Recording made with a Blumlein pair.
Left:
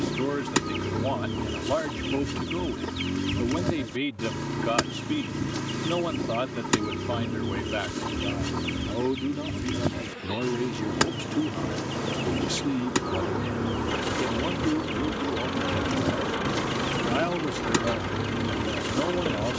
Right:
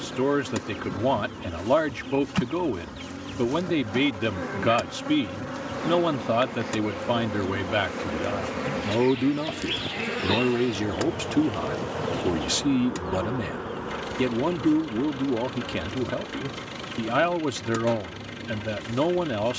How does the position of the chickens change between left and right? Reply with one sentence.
In this clip you hear the chickens stay in one place.